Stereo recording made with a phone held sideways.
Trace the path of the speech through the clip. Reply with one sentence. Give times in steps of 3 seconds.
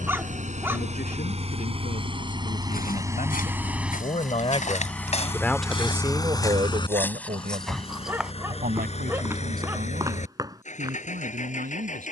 In this clip you hear the speech on the left from 0 s and on the right from 6 s.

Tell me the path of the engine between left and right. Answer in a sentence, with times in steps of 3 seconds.
In this clip you hear the engine on the right from 0 s, in the centre from 3 s and on the left from 6 s.